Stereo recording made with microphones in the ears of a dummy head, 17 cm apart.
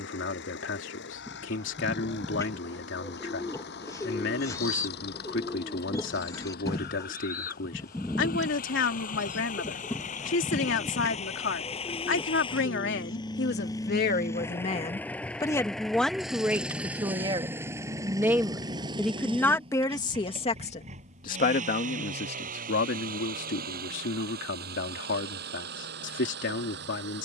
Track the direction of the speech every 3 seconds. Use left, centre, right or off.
left, left, left, left, left, centre, centre, left, left.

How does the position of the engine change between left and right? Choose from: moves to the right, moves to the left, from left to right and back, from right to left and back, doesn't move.
moves to the right.